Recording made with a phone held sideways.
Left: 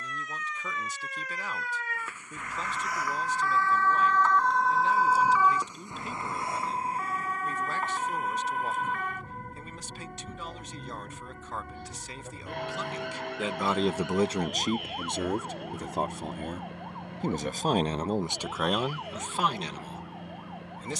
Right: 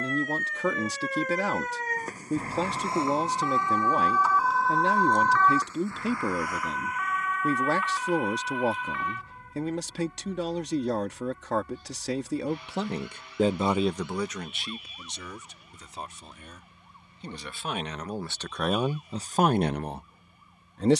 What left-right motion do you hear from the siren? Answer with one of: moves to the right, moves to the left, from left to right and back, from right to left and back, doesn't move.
moves to the left.